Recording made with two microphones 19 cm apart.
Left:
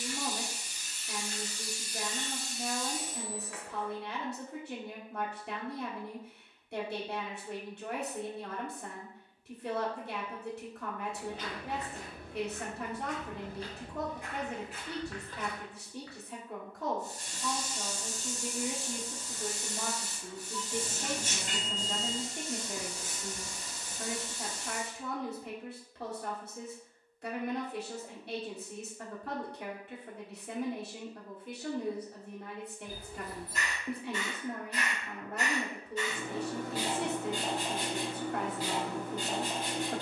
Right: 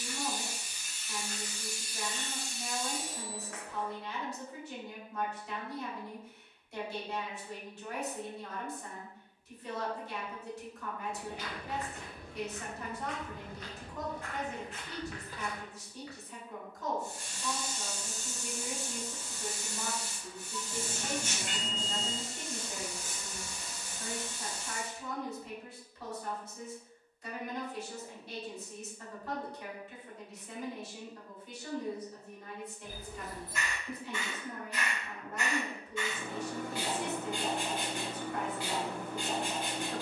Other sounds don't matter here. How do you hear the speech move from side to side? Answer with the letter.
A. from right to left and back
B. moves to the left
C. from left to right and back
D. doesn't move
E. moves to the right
D.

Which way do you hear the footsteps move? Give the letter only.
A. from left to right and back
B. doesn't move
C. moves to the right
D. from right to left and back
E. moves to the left
D.